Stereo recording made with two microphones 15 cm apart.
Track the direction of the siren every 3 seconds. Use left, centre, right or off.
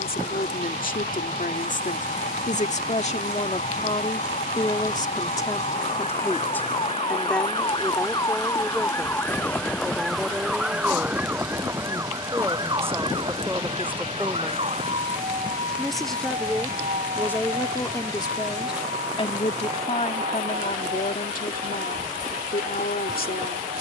left, left, left, centre, right, right, right, right.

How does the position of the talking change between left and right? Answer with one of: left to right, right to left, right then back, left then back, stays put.
right then back.